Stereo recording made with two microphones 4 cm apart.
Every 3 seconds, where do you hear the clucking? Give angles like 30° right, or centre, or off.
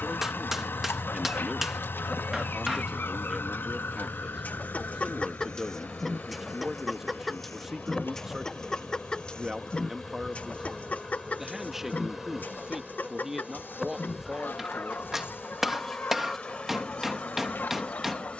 60° left, 40° left, 10° left, 30° left, 60° left, 60° left.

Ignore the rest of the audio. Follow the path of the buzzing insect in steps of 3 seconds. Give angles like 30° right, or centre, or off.
30° left, 30° left, 20° left, centre, centre, 20° left.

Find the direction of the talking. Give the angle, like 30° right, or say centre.
10° right.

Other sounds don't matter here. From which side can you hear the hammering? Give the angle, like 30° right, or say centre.
10° right.